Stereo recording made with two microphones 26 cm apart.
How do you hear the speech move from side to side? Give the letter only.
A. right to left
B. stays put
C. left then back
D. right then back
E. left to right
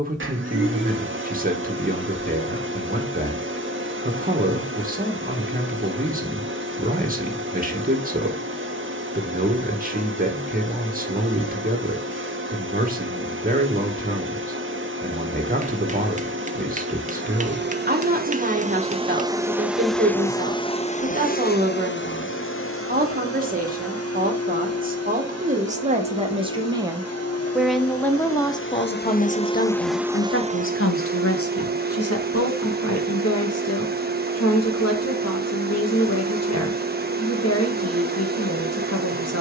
A.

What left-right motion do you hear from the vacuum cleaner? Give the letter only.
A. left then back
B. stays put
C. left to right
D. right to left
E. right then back
A.